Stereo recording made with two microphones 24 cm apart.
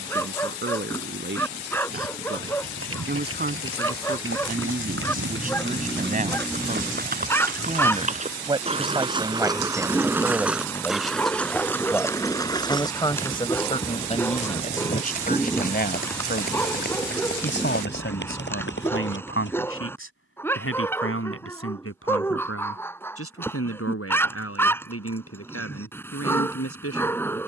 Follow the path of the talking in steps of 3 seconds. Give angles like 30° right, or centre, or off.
50° right, 40° right, 30° right, 10° right, 20° left, 50° left, 60° left, 70° left, 70° left.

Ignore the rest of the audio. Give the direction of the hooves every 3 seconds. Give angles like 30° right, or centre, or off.
70° right, 60° right, 40° right, 10° right, 20° left, 40° left, 50° left, off, off.